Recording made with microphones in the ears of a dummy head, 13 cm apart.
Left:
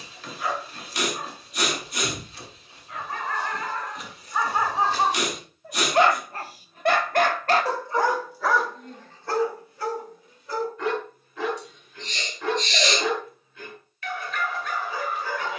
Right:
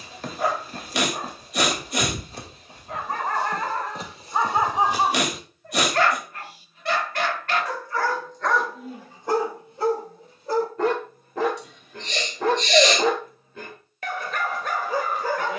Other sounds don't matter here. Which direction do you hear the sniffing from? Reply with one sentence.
In this clip you hear the sniffing on the right.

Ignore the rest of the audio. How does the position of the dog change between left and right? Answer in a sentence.
You can hear the dog go left and come back.